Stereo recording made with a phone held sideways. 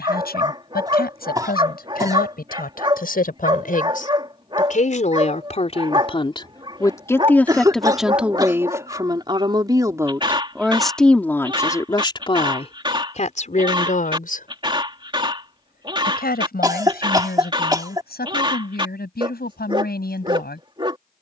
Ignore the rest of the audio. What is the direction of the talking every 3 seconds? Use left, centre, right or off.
left, left, centre, centre, left, left, left.